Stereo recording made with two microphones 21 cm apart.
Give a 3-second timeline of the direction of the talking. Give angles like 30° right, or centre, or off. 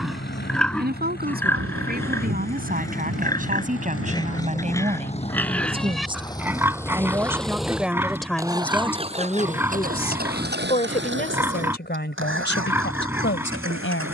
50° right, 30° right, 10° right, 30° left, 60° left.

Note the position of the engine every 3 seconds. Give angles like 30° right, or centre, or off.
50° left, 30° left, centre, 50° right, 70° right.